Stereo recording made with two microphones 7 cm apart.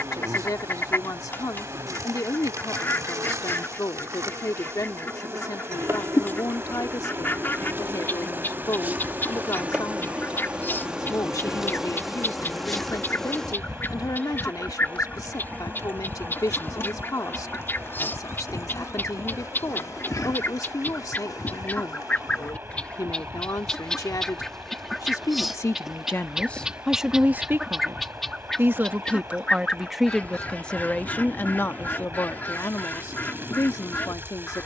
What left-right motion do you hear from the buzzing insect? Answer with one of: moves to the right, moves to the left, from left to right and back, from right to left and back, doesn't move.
moves to the left.